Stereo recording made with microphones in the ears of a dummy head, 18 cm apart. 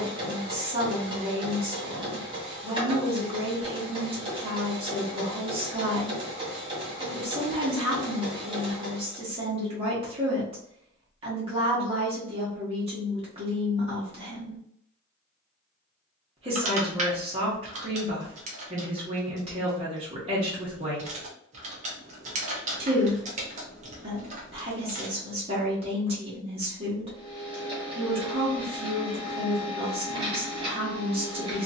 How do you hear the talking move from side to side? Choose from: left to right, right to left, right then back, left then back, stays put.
stays put.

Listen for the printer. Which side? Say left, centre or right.
right.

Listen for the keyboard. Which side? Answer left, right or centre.
right.